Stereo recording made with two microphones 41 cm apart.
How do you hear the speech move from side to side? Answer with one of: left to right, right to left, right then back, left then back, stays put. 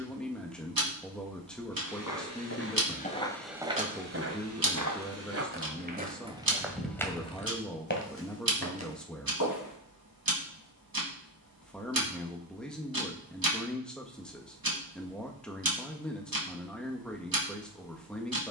stays put.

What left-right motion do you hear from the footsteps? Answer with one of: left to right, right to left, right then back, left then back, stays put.
right then back.